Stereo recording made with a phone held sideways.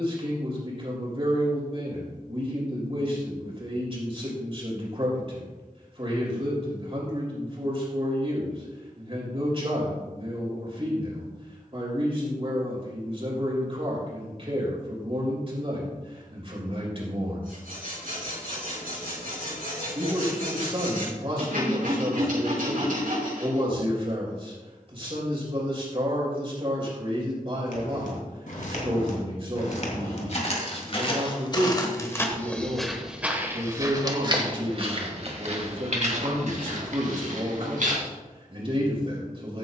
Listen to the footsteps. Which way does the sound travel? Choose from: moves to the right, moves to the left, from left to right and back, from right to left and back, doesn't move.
moves to the right.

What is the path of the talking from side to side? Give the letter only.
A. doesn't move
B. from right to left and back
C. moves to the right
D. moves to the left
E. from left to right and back
A.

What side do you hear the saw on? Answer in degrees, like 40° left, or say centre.
80° right.